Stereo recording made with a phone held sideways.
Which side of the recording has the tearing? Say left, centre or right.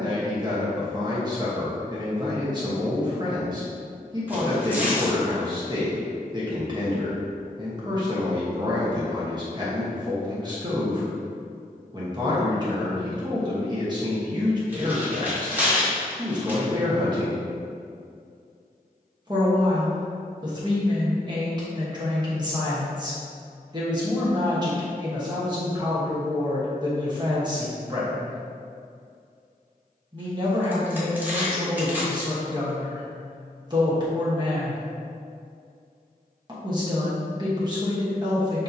centre.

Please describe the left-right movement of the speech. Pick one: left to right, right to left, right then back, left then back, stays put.
stays put.